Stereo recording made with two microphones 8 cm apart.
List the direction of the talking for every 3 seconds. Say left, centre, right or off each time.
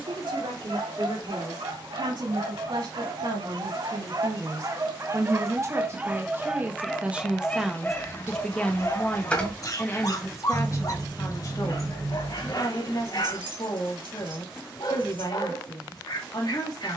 right, right, centre, left, left, left.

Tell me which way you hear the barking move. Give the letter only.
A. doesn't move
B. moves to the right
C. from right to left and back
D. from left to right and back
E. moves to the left
E.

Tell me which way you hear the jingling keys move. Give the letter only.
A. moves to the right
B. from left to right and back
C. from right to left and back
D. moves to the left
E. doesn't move
A.